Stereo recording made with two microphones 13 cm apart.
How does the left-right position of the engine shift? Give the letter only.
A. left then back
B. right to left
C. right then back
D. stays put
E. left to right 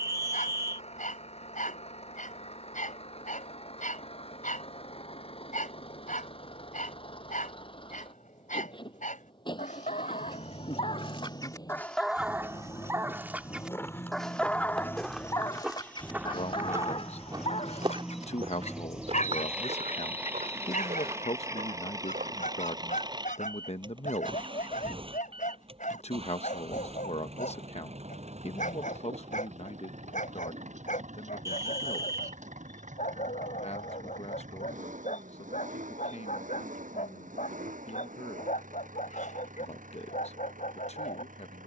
E.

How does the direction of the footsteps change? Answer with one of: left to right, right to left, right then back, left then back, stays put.
left to right.